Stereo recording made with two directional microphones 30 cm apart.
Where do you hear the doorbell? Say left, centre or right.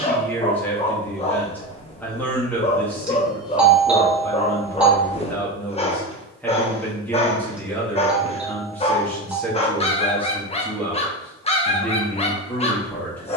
centre.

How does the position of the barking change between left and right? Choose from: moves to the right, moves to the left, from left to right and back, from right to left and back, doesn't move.
doesn't move.